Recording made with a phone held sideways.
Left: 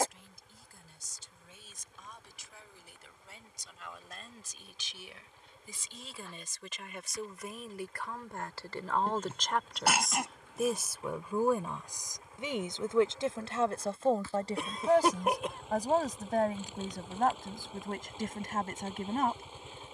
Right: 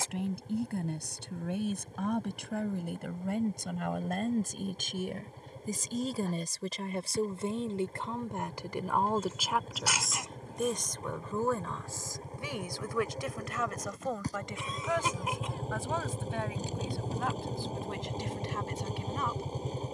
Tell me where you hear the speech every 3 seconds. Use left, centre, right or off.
right, right, right, centre, left, left, left.